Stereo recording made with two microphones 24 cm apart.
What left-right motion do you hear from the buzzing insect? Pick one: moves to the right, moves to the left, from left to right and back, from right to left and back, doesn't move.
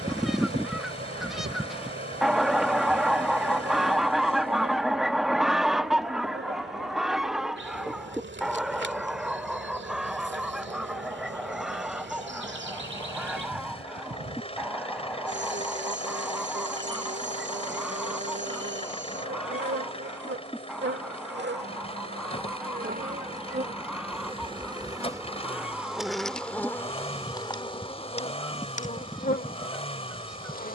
moves to the left.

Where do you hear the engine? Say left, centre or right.
left.